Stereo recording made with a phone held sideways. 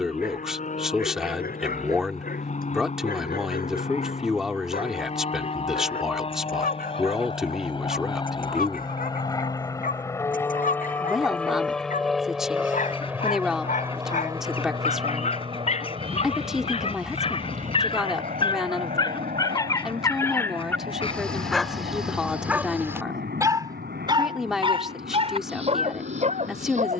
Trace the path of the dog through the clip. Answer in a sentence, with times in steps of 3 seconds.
You can hear the dog on the left from 0 s, in the centre from 21 s and on the right from 24 s.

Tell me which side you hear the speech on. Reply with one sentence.
You can hear the speech in the centre.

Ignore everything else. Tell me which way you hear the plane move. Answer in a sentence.
You can hear the plane move from left to right.